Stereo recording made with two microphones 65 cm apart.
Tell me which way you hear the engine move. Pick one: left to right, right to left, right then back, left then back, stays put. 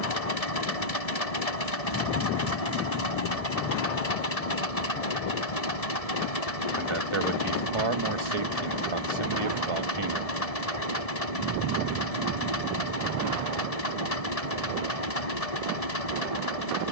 stays put.